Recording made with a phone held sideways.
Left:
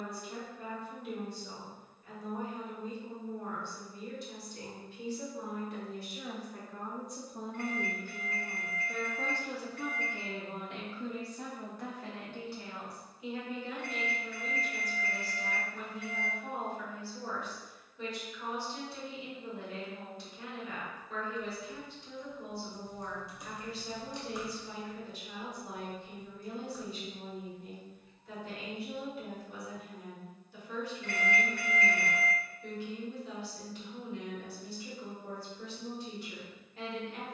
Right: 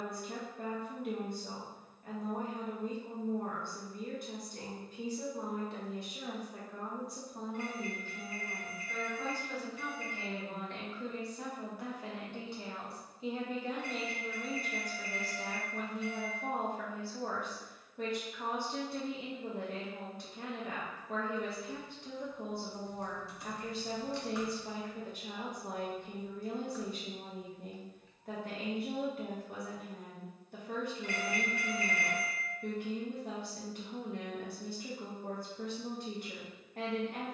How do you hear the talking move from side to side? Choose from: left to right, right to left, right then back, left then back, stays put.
left then back.